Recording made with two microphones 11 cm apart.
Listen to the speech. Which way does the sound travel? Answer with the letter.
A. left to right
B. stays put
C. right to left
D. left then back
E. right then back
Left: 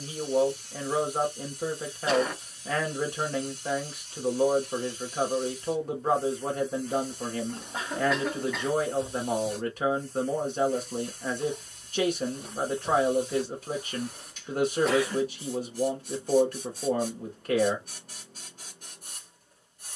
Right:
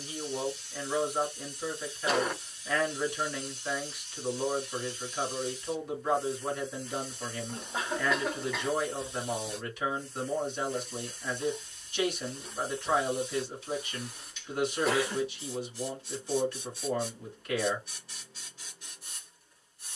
B.